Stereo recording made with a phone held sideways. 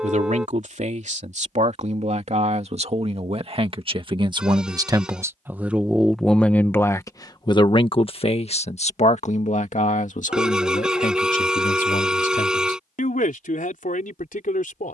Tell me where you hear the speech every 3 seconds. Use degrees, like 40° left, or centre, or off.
60° right, 30° right, 30° left, 70° left, 80° left.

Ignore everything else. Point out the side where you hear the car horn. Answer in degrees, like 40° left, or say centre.
10° right.